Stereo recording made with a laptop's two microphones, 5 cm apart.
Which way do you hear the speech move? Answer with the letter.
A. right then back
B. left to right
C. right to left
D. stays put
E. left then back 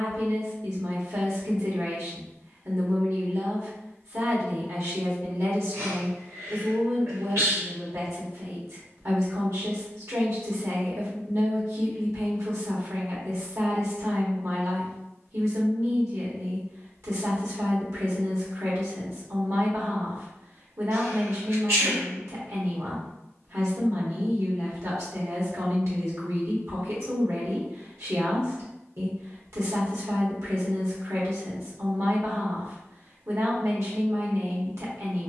D.